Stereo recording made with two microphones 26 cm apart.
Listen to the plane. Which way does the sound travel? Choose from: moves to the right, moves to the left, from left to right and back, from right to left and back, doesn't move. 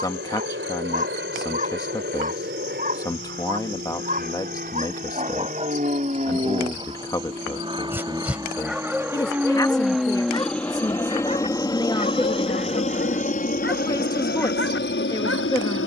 moves to the left.